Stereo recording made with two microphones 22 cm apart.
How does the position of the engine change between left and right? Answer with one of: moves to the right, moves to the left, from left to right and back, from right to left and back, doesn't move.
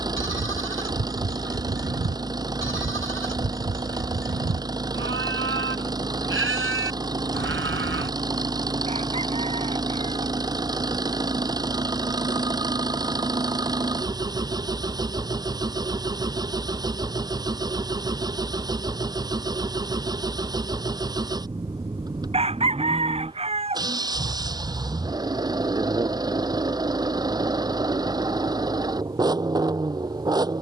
doesn't move.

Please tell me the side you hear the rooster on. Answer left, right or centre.
right.